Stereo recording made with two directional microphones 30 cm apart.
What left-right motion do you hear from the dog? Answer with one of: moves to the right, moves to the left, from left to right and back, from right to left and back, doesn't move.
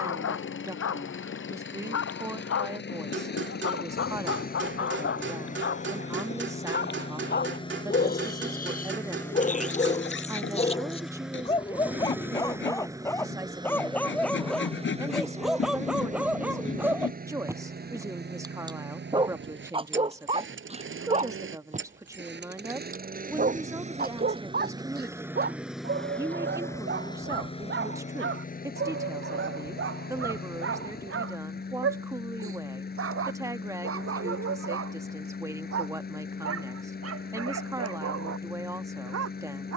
moves to the right.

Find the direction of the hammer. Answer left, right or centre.
right.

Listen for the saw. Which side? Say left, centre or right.
left.